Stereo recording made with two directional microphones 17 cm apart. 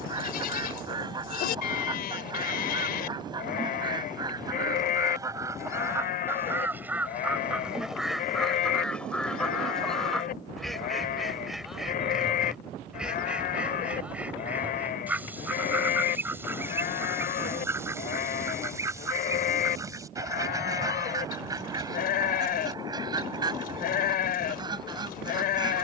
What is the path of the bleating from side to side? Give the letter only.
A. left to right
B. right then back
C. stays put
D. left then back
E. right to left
C.